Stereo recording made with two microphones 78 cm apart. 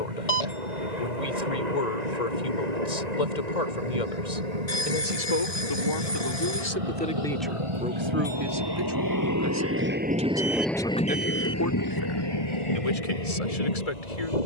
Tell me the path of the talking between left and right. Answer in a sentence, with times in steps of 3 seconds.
In this clip you hear the talking on the left from 0 s, in the centre from 6 s and on the left from 12 s.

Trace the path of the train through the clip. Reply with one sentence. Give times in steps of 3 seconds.
In this clip you hear the train on the right from 0 s, in the centre from 9 s and on the left from 12 s.